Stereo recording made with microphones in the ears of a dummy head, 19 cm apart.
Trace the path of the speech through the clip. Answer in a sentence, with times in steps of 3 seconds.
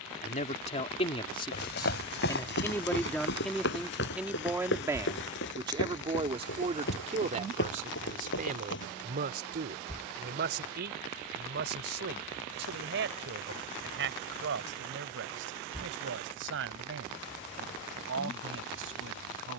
You can hear the speech on the left from 0 s, in the centre from 3 s and on the right from 6 s.